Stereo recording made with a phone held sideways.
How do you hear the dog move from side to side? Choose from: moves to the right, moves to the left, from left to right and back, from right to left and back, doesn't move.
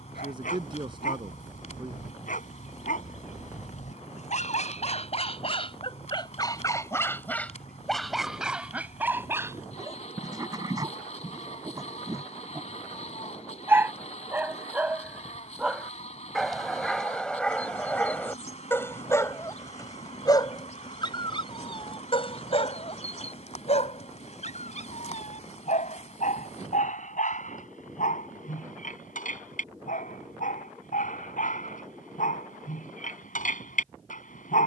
from left to right and back.